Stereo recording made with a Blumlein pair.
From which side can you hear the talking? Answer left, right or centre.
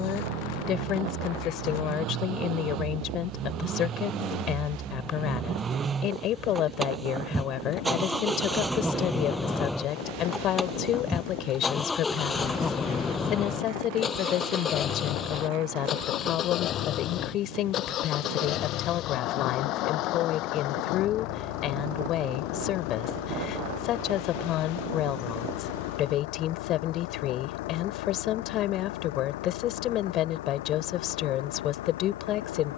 left.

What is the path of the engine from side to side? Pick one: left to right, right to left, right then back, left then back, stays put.
right to left.